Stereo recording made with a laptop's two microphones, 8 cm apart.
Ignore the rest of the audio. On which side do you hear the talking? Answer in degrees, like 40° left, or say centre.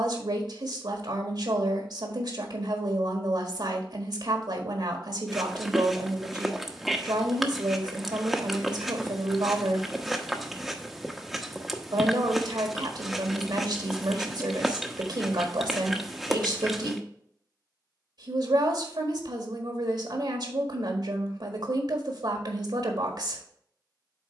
70° right.